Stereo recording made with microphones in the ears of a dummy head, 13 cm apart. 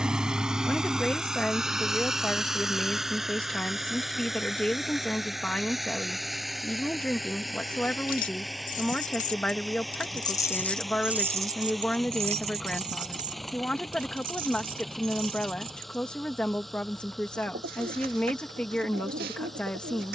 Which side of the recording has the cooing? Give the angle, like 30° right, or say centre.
70° right.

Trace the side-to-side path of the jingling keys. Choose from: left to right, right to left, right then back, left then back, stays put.
left to right.